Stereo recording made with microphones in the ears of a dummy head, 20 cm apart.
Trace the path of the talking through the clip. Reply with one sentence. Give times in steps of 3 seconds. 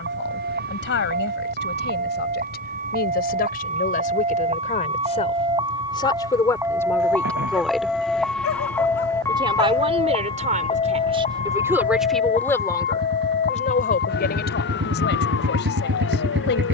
You can hear the talking on the left from 0 s, in the centre from 6 s, on the right from 9 s and on the left from 12 s.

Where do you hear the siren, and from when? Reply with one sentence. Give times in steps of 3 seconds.
In this clip you hear the siren on the right from 0 s, in the centre from 6 s and on the left from 9 s.